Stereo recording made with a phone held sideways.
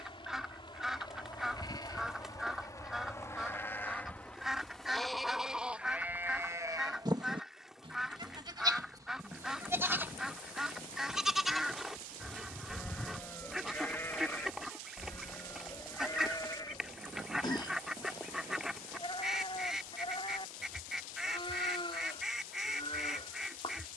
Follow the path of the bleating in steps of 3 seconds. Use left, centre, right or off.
left, centre, right, centre, centre, left, left, left.